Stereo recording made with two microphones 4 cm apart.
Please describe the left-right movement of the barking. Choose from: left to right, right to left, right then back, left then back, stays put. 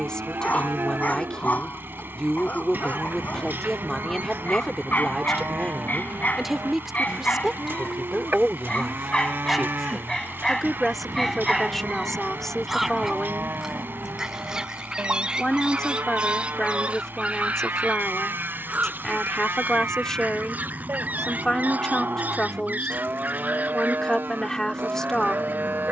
left to right.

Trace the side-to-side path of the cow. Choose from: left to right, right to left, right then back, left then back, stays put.
stays put.